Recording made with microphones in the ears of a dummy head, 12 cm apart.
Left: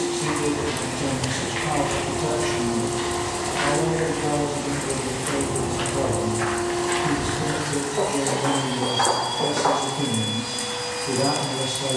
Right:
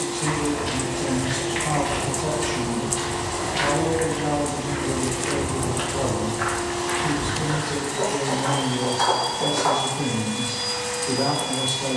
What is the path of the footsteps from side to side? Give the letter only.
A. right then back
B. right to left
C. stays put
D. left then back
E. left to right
B.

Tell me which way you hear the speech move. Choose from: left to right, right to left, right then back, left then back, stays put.
stays put.